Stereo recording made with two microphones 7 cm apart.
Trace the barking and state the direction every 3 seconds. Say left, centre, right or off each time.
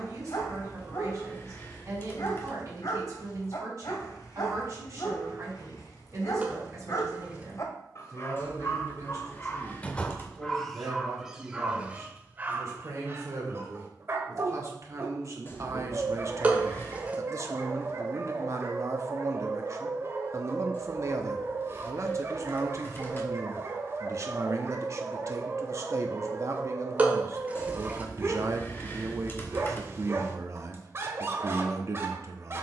left, left, left, centre, right, right, right, right, right, right, right.